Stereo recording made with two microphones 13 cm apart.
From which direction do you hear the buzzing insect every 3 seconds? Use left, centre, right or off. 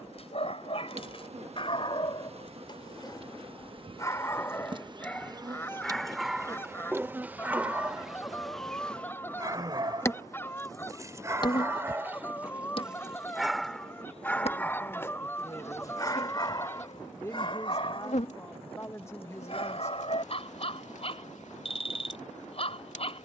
right, right, centre, left, left, left, left, left.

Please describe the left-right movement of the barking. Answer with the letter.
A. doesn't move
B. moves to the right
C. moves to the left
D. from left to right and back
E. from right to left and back
D.